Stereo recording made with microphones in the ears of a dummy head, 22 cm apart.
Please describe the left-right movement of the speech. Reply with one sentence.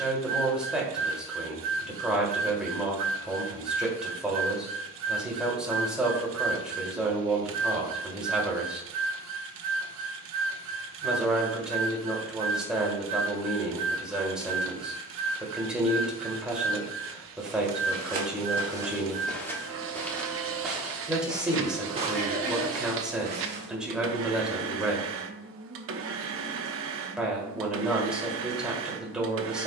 You can hear the speech stay put.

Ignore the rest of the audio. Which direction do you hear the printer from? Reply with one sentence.
You can hear the printer on the right.